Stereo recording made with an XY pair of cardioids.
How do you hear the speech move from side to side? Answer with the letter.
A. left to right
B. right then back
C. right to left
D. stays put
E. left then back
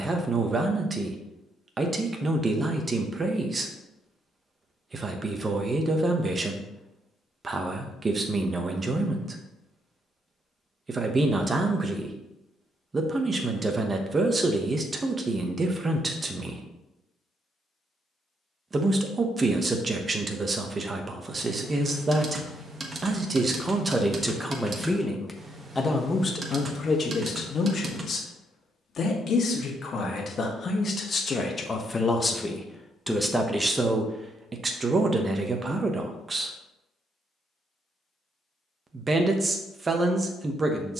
E.